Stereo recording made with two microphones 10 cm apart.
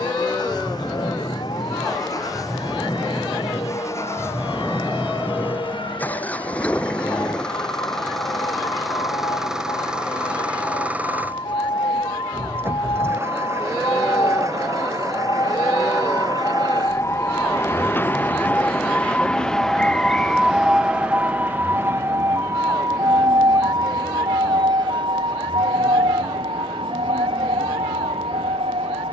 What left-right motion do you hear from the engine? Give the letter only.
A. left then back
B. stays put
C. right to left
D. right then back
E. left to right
E.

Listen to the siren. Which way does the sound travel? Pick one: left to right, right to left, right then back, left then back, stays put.
left to right.